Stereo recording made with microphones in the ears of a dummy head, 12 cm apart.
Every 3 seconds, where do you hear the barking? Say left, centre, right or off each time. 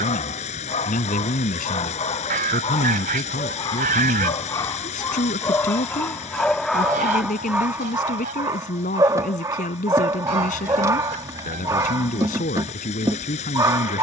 left, left, centre, right, right.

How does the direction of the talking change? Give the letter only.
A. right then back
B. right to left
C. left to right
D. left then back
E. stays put
E.